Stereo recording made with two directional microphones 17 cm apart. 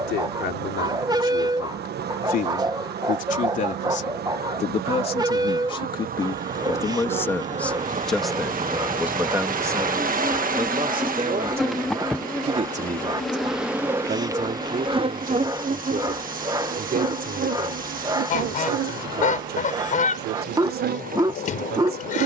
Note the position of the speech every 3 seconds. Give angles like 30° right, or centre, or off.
60° left, 40° left, 10° left, 20° right, 50° right, 60° right, 60° right, 70° right.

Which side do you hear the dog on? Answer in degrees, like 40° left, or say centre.
20° right.